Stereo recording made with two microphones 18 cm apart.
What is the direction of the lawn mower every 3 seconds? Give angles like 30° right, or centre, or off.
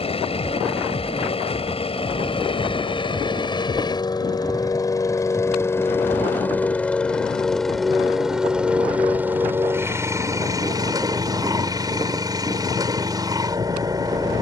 30° left, 20° left, centre, 20° right, 20° right.